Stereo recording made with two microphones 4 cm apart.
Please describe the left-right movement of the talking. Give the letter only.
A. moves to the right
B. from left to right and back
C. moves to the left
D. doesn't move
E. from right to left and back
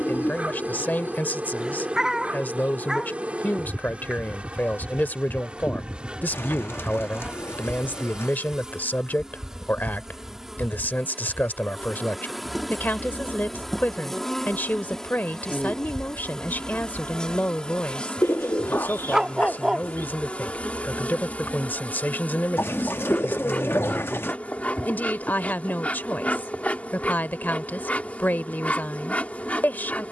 D.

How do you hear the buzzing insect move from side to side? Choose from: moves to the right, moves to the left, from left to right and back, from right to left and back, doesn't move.
moves to the left.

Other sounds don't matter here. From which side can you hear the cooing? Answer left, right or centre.
left.